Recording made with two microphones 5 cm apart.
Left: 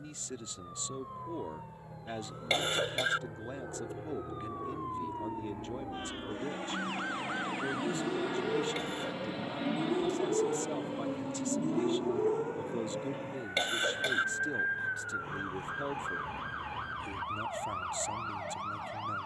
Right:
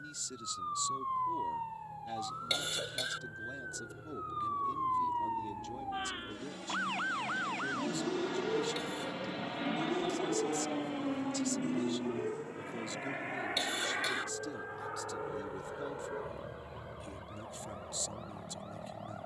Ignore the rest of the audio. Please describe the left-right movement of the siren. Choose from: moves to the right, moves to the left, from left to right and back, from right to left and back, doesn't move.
moves to the left.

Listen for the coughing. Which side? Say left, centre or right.
left.